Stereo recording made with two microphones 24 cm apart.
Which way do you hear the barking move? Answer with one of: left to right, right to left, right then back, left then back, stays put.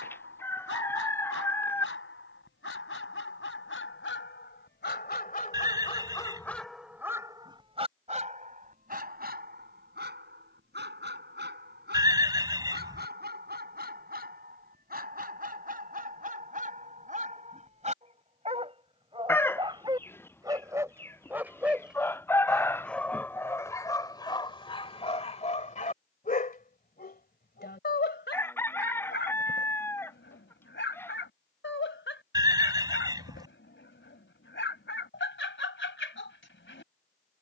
right then back.